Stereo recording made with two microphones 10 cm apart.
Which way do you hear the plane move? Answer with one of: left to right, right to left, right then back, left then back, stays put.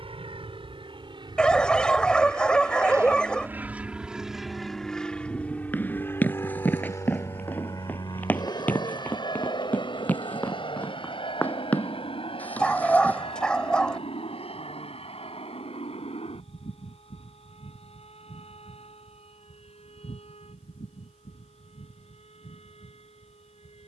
right to left.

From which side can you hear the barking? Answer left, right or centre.
centre.